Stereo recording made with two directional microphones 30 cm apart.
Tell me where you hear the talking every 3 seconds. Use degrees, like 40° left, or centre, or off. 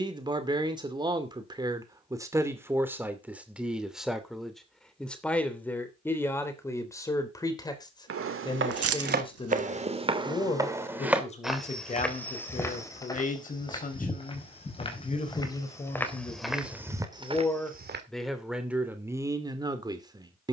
10° right, centre, 10° left, 20° left, 30° left, 20° left, 10° right.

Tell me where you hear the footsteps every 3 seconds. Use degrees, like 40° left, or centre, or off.
off, off, 40° right, 10° right, 10° left, centre, off.